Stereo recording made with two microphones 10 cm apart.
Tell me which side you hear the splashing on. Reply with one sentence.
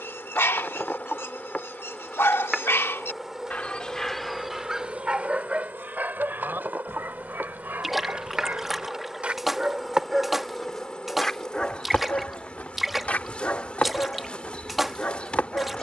You can hear the splashing in the centre.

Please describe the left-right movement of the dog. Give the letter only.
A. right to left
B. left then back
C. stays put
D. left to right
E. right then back
E.